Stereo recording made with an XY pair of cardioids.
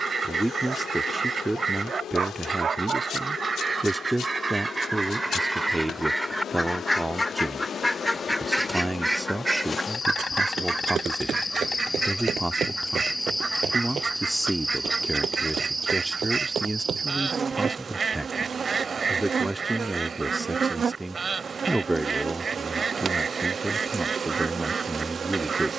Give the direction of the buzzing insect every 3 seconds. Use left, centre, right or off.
left, left, left, left, centre, right, right, right, right.